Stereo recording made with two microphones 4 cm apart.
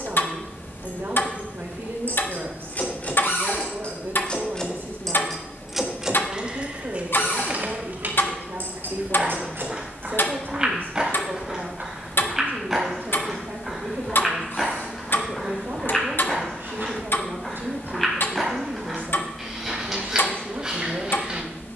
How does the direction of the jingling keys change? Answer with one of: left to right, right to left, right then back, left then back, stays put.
left to right.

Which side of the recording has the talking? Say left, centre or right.
right.